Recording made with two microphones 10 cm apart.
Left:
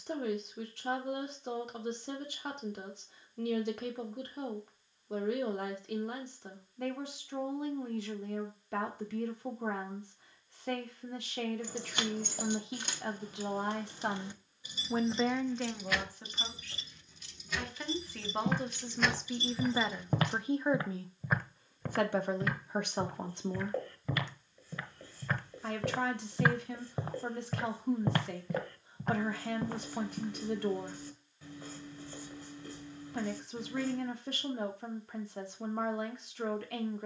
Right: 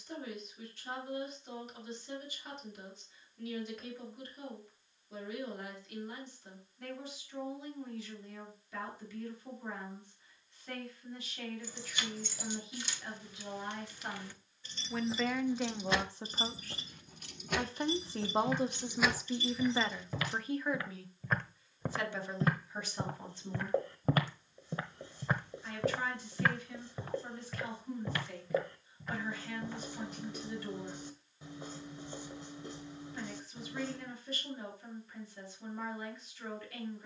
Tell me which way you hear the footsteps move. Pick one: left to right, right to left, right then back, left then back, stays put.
right then back.